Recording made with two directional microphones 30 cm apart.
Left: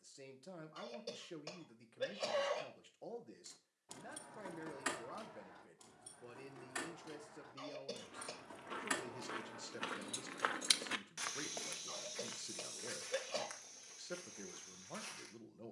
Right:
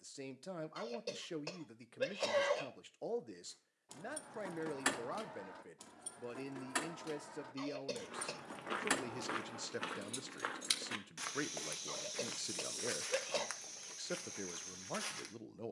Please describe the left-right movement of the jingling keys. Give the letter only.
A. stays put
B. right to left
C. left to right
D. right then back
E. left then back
D.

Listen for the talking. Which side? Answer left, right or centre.
right.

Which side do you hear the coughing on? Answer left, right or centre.
right.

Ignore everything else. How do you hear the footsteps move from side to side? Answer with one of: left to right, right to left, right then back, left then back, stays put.
left then back.